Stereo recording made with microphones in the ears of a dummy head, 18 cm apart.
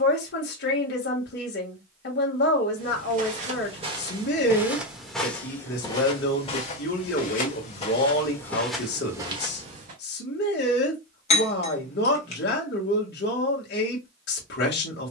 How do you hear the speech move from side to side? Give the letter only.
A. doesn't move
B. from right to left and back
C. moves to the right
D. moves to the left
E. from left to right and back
A.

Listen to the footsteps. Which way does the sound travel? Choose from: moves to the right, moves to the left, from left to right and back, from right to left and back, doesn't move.
from right to left and back.